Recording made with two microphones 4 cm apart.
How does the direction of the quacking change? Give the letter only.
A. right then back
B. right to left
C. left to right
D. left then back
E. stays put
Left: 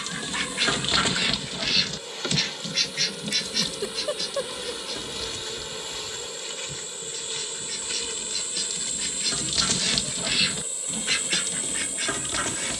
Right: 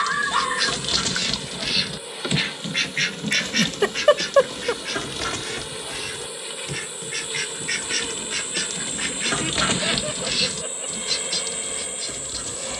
A.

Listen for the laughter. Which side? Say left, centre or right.
right.